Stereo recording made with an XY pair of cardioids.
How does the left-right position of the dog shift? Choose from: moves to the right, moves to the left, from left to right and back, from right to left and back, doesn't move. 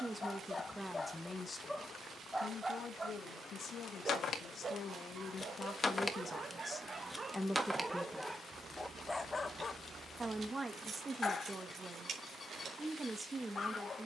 from left to right and back.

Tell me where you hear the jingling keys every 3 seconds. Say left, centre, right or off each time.
off, left, centre, right, right.